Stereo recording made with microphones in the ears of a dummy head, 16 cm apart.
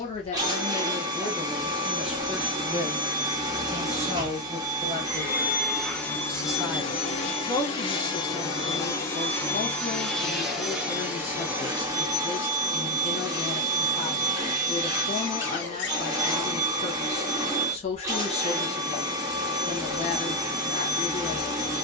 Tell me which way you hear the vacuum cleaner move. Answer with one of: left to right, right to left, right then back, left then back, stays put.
left then back.